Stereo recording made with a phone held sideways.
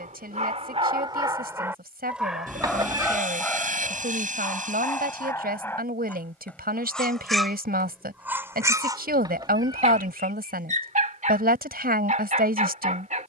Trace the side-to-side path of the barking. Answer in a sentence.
In this clip you hear the barking move from right to left and back again.